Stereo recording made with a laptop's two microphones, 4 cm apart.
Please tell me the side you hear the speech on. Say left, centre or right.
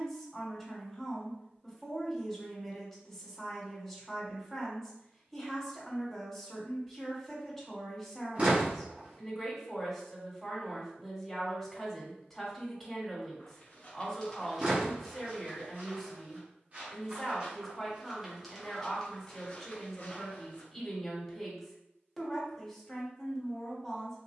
centre.